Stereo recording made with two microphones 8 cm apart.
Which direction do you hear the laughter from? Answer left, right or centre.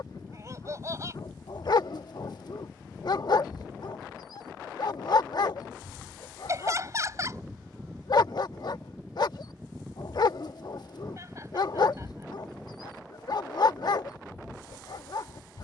right.